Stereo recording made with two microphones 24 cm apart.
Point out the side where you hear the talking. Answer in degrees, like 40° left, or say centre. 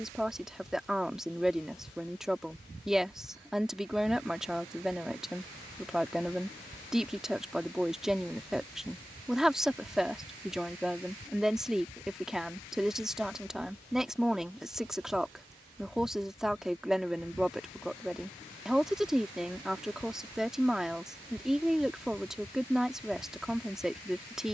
centre.